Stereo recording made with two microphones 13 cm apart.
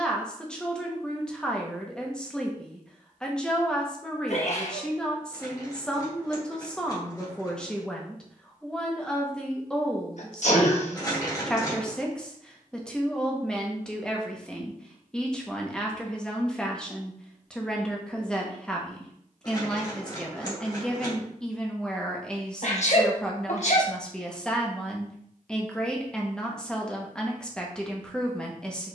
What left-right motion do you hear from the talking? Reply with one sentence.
You can hear the talking stay in one place.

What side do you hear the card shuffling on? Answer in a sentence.
In this clip you hear the card shuffling on the left.